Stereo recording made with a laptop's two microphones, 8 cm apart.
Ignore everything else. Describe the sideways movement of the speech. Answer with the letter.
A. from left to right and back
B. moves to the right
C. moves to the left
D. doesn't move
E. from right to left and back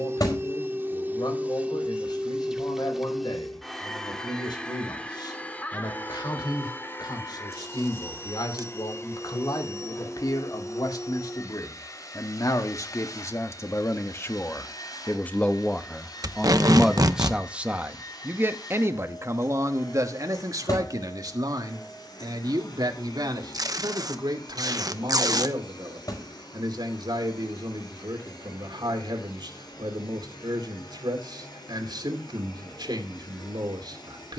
B.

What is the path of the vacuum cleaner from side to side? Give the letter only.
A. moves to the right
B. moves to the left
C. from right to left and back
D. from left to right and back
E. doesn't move
B.